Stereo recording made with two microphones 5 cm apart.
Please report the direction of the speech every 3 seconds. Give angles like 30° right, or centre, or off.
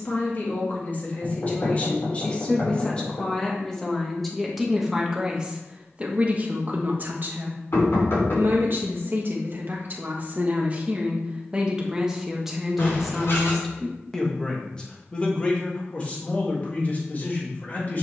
30° left, centre, 40° right, 30° right, centre, 30° left.